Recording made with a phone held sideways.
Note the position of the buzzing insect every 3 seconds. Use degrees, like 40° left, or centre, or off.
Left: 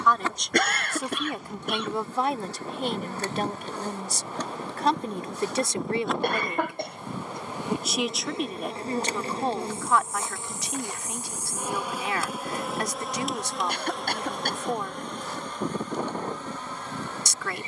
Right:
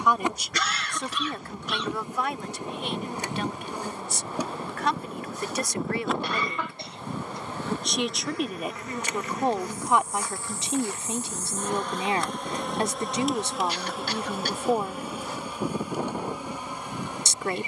20° right, 10° right, 20° left, 20° left, centre, 10° right.